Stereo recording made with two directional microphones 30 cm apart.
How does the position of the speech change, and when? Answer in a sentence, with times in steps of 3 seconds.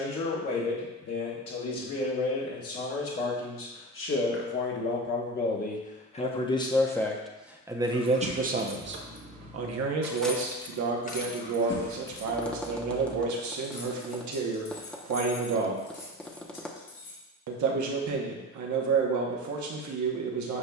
You can hear the speech on the left from 0 s, in the centre from 6 s and on the right from 9 s.